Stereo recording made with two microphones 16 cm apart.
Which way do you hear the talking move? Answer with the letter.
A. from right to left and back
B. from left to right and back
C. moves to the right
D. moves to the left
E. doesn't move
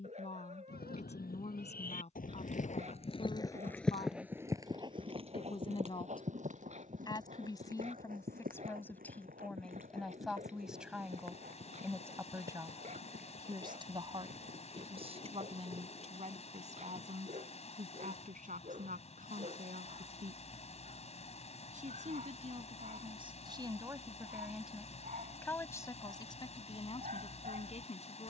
B.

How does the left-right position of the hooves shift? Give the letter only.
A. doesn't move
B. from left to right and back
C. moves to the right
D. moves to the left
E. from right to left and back
C.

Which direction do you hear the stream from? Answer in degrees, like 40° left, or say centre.
40° left.